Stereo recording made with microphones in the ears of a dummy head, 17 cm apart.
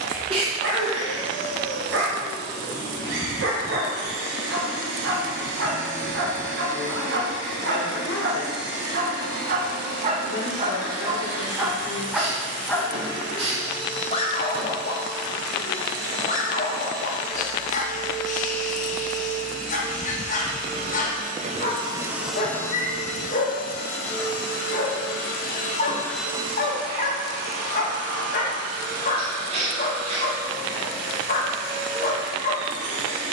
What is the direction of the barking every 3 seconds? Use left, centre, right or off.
right, right, right, right, left, left, left, left, left, left, left.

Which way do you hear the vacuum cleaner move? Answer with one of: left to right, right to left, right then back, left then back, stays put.
left then back.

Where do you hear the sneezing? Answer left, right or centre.
right.